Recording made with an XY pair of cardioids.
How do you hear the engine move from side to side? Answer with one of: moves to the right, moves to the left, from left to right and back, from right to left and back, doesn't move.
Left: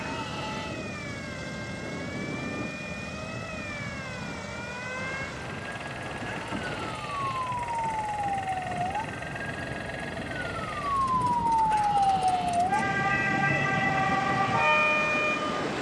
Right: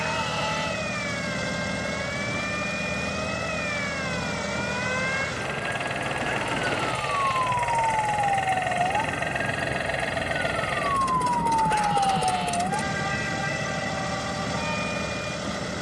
doesn't move.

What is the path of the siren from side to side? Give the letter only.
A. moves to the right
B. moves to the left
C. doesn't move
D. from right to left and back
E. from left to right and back
B.